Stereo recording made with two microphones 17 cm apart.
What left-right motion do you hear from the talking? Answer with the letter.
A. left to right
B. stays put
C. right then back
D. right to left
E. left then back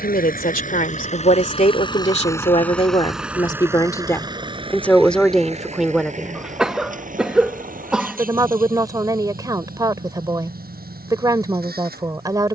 A.